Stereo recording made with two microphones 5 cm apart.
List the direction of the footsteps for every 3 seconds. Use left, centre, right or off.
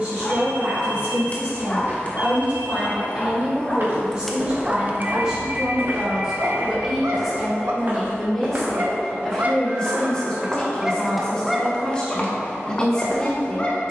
off, right, right, centre, left.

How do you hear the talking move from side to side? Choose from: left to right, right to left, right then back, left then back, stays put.
right to left.